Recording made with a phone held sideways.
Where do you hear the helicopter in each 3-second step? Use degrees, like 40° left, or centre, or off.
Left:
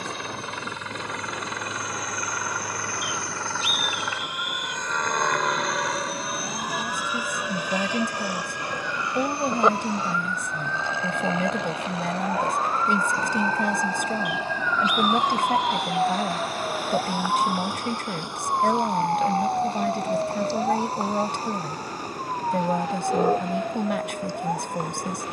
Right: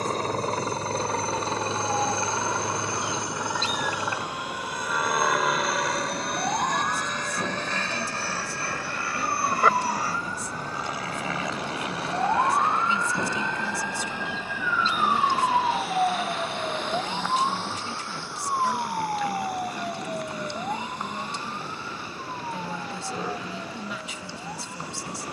30° right, 10° right, 10° left, 20° left, 30° left, 40° left, 50° left, 50° left, 50° left.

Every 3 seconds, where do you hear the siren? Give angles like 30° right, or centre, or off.
70° right, 60° right, 50° right, 40° right, 20° right, centre, 30° left, 40° left, 50° left.